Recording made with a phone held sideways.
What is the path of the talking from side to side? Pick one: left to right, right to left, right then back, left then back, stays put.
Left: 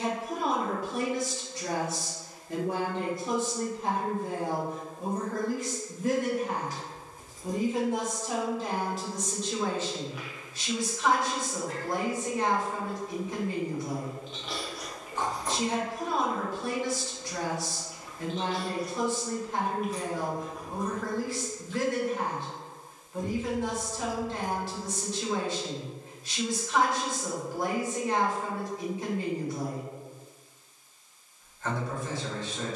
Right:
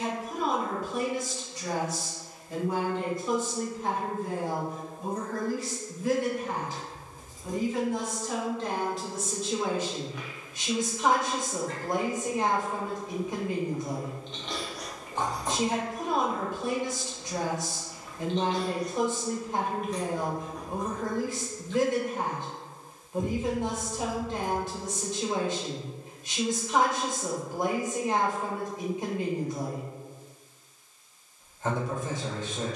left to right.